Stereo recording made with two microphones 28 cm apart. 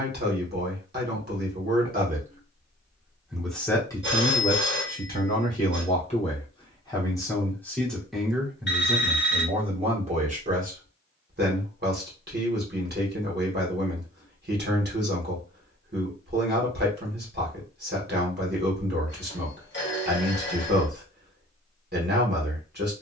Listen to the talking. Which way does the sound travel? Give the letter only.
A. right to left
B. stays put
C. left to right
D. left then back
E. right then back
D.